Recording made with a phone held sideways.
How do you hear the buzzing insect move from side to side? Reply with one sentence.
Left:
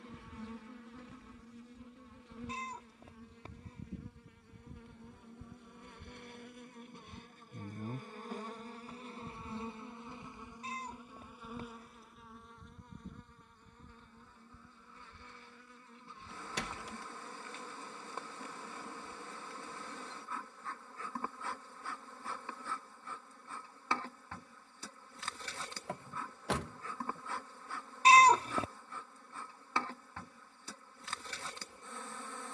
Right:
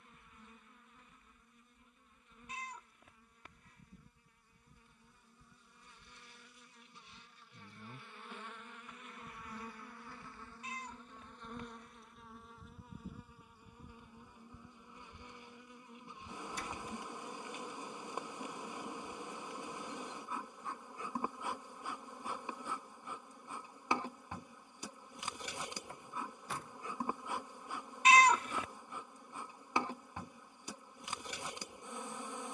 You can hear the buzzing insect travel towards the right.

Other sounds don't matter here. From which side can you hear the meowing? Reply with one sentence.
In this clip you hear the meowing on the left.